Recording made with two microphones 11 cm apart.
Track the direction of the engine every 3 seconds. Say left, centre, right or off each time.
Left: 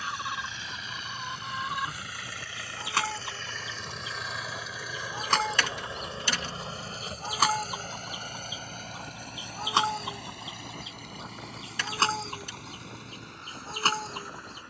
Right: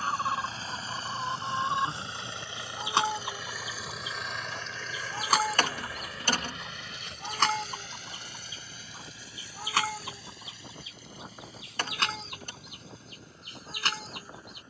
right, centre, left, left, left.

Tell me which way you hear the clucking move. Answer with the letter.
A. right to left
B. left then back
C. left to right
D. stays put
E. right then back
A.